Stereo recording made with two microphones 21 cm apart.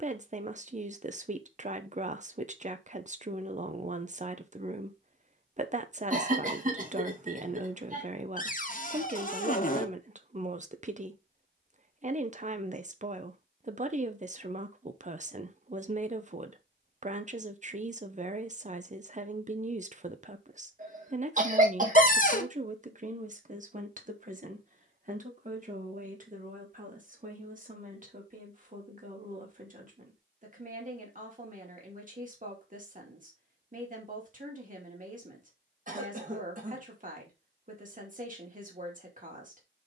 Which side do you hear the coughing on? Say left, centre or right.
right.